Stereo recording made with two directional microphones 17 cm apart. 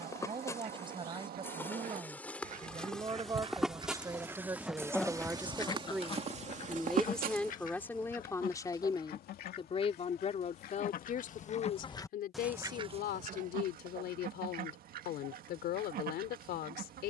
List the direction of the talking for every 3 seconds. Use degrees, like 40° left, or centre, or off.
30° right, 20° right, 10° left, 50° left, 70° left, 70° left.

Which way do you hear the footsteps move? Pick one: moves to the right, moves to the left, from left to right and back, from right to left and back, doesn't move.
moves to the right.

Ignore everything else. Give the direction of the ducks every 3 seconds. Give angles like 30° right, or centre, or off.
60° right, 10° right, 50° left, 60° left, 40° right, 60° right.